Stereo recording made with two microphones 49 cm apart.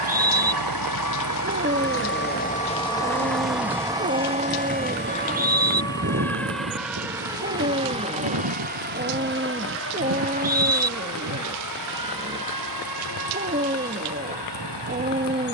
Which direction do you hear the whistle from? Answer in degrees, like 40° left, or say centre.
20° right.